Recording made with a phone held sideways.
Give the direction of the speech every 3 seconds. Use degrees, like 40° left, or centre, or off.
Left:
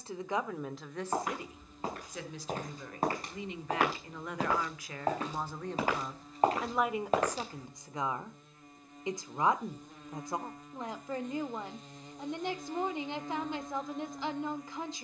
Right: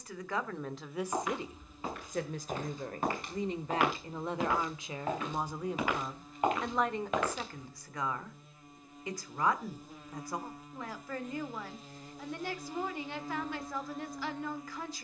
20° right, 20° right, 10° left, 20° left, 20° left.